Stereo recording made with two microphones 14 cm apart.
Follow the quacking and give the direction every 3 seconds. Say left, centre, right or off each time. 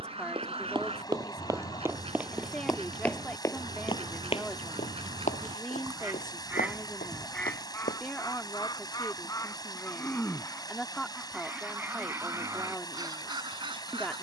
right, right, centre, centre, right.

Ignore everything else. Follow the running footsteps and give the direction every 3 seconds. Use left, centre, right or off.
right, left, left, off, off.